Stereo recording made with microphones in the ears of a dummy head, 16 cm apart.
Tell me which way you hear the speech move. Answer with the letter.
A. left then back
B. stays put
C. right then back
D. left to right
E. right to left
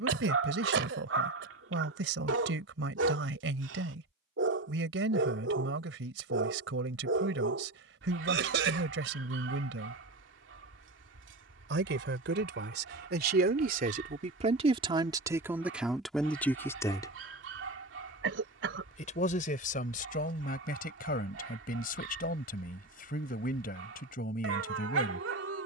E.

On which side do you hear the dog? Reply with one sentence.
In this clip you hear the dog on the right.